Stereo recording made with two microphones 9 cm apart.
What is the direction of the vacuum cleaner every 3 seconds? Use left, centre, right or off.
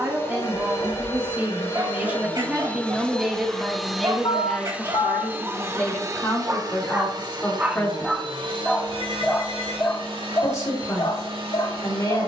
left, centre, right, right.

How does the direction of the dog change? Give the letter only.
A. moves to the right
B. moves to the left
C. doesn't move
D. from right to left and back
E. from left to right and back
B.